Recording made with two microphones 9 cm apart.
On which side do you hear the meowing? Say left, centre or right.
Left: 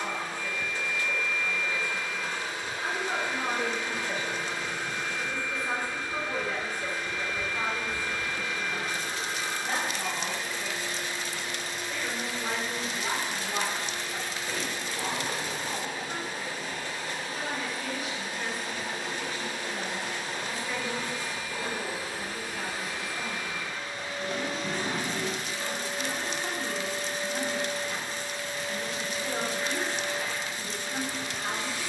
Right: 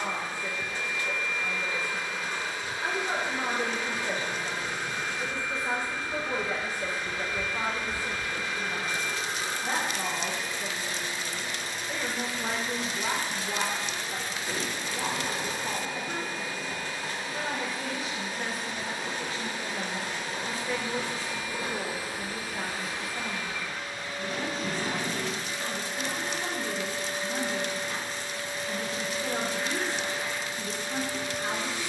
right.